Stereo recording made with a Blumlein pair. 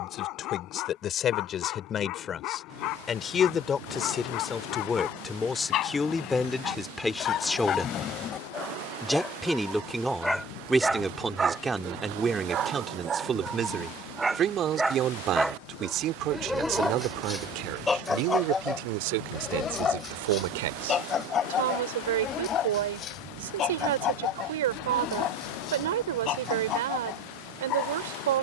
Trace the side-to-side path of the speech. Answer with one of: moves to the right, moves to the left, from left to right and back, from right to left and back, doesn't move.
moves to the right.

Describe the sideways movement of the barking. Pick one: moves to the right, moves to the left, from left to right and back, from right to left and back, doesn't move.
from left to right and back.